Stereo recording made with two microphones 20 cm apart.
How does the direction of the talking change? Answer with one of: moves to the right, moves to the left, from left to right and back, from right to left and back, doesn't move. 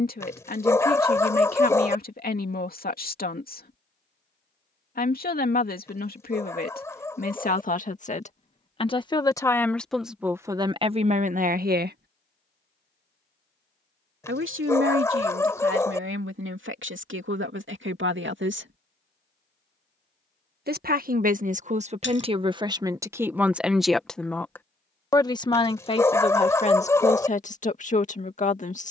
from left to right and back.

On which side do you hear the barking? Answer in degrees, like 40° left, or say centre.
10° left.